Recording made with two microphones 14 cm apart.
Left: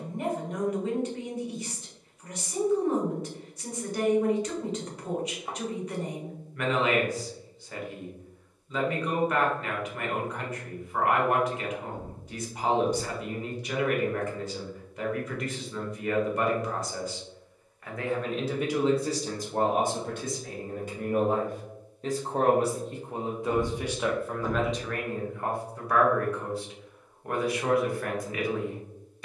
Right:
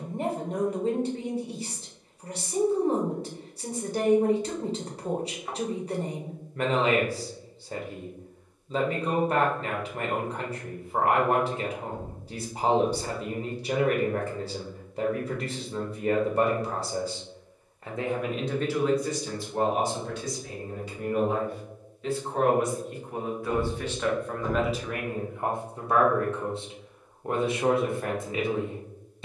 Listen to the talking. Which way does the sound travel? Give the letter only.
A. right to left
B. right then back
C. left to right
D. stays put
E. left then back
E.